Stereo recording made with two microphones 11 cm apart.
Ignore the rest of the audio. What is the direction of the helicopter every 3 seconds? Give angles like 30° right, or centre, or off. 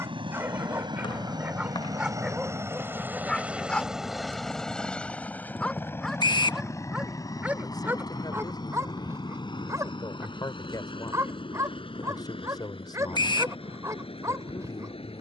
40° right, centre, 30° left, 50° left, 60° left.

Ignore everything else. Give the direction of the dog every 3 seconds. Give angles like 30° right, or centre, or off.
10° right, 10° left, 10° right, 30° right, 30° right.